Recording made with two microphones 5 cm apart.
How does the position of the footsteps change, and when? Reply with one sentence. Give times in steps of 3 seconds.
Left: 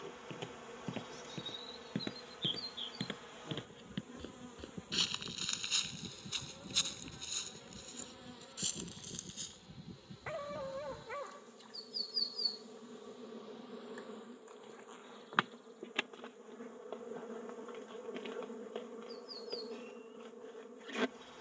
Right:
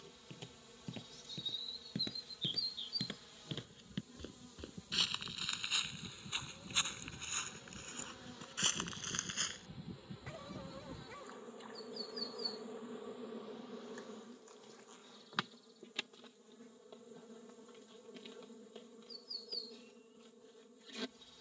In this clip you hear the footsteps on the left from 0 s, in the centre from 3 s, on the right from 6 s and not at all from 12 s.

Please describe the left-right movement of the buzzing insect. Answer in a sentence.
In this clip you hear the buzzing insect move from left to right and back again.